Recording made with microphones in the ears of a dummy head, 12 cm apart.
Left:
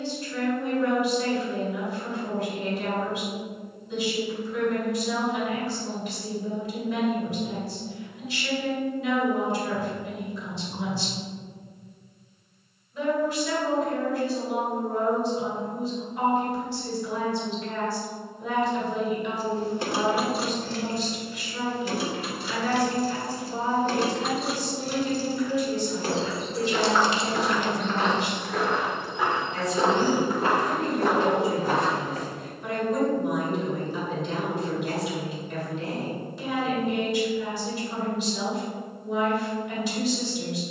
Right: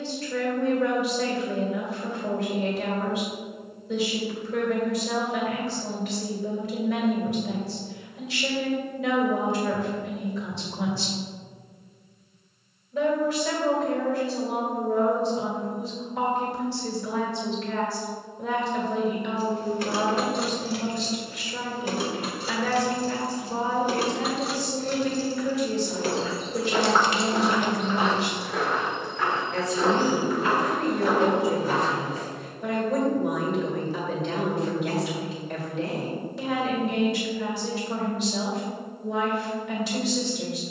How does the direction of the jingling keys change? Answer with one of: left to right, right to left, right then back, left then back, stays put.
right then back.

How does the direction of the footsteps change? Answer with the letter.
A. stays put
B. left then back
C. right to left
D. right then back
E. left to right
C.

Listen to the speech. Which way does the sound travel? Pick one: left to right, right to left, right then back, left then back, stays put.
stays put.